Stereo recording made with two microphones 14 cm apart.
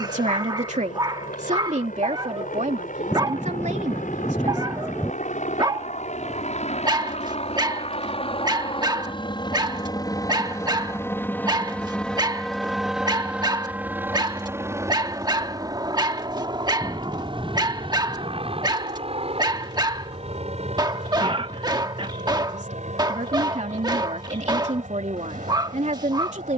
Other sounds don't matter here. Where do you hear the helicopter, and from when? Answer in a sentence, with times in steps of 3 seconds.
You can hear the helicopter on the left from 0 s, in the centre from 12 s and on the right from 15 s.